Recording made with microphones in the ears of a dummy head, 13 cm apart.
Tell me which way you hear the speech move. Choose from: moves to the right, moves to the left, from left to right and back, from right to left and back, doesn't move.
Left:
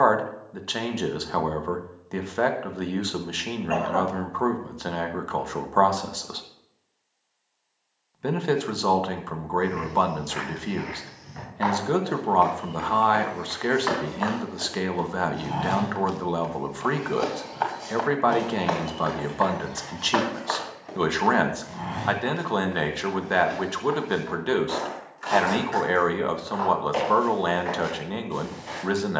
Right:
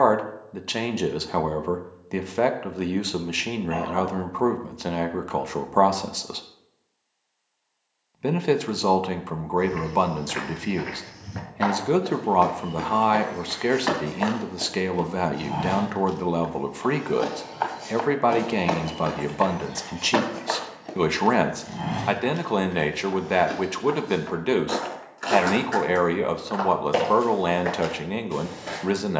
doesn't move.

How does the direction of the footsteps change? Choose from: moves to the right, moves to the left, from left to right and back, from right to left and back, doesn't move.
from right to left and back.